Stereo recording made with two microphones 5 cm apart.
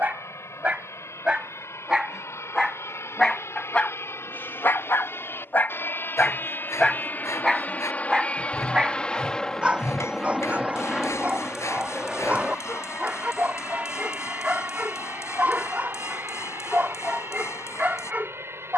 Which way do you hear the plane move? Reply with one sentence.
In this clip you hear the plane travel towards the right.